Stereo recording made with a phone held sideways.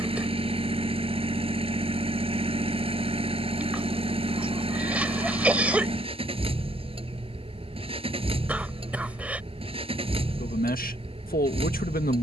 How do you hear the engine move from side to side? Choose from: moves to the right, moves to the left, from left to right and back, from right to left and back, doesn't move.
doesn't move.